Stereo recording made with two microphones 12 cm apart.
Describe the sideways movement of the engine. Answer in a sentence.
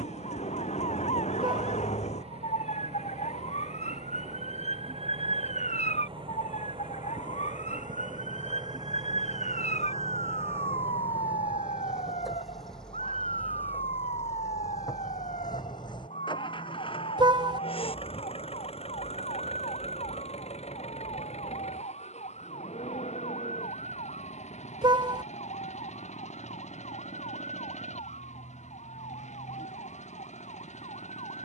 In this clip you hear the engine travel towards the left.